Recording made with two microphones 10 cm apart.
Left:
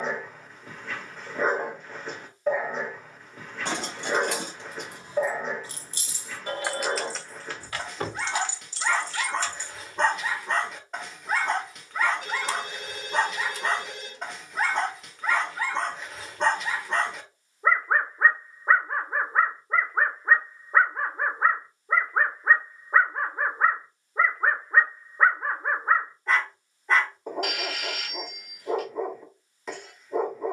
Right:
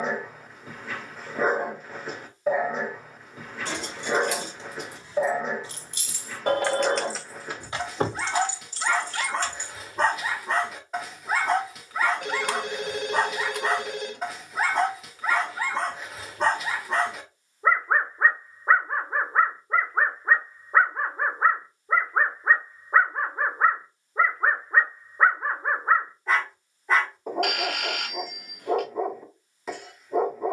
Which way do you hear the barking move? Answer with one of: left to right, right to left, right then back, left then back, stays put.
stays put.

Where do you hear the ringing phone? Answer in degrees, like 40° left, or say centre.
60° right.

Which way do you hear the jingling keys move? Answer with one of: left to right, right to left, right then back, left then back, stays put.
left to right.